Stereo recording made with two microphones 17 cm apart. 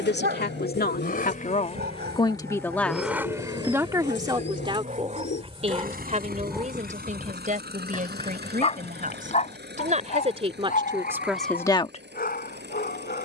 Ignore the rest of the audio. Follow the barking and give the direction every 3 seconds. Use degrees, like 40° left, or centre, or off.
70° right, 50° right, 10° left, 50° left, 60° left.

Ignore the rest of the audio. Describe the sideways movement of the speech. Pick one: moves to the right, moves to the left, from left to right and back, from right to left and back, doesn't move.
from left to right and back.